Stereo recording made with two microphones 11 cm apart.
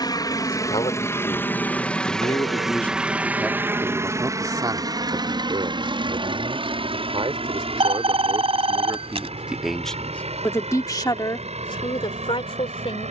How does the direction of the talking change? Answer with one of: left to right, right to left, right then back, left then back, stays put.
right then back.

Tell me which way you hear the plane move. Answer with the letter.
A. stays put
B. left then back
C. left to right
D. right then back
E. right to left
C.